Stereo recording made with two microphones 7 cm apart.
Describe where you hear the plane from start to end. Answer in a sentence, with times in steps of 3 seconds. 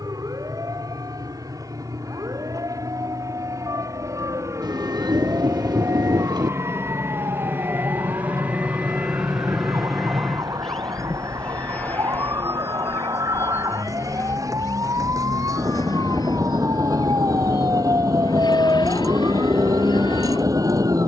In this clip you hear the plane on the right from 0 s, in the centre from 9 s and on the left from 12 s.